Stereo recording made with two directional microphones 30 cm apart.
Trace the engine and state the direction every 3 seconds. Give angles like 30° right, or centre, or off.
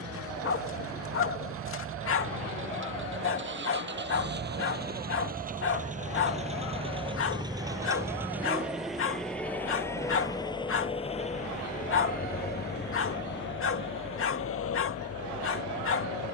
40° right, 30° right, 10° right, 10° left, 40° left, 50° left.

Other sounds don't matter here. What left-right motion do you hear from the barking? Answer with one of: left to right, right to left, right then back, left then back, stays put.
stays put.